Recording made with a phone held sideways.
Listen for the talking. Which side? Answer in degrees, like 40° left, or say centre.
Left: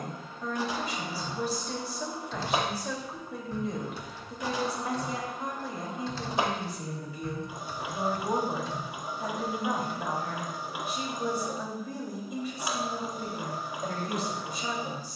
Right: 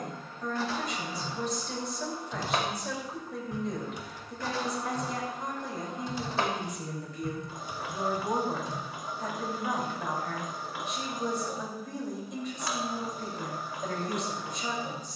centre.